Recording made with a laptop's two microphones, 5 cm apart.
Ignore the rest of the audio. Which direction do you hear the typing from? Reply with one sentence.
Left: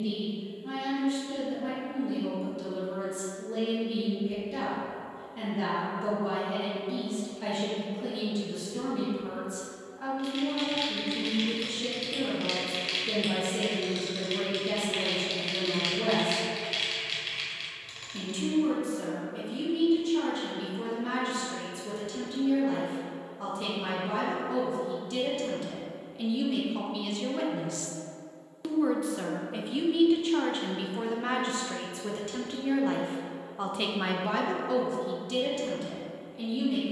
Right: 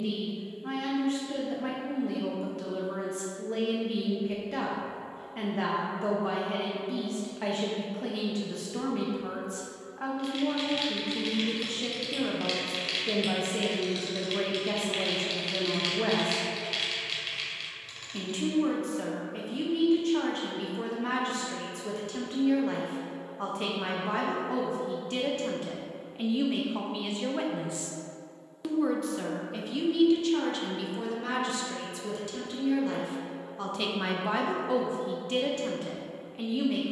In this clip you hear the typing in the centre.